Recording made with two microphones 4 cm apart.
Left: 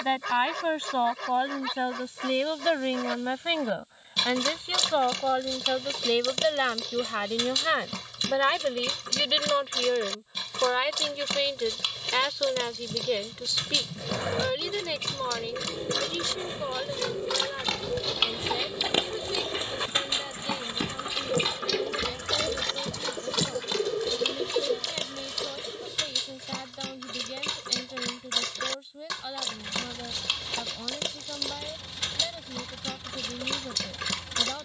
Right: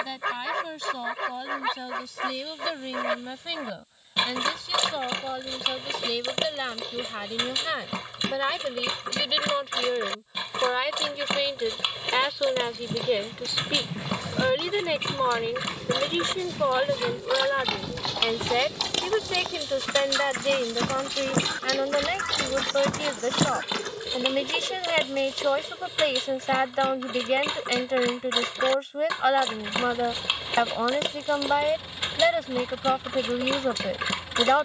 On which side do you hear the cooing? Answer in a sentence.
In this clip you hear the cooing on the left.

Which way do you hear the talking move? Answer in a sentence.
In this clip you hear the talking go from the left side to the right.